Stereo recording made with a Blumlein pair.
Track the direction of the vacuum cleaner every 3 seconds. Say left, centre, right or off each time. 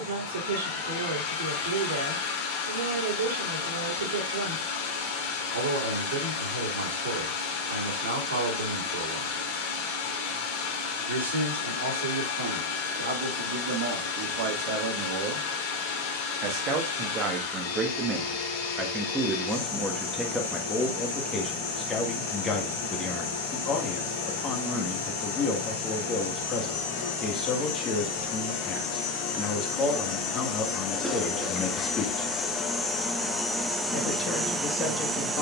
left, left, left, left, left, left, left, left, left, left, left, centre.